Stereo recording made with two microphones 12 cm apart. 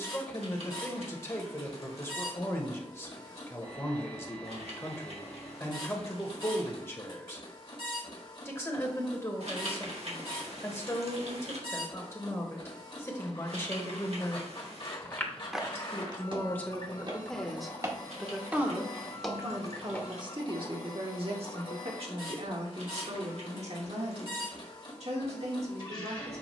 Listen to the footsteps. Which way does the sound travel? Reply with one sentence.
In this clip you hear the footsteps move from left to right and back again.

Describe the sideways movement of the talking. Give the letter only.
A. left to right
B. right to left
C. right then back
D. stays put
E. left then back
A.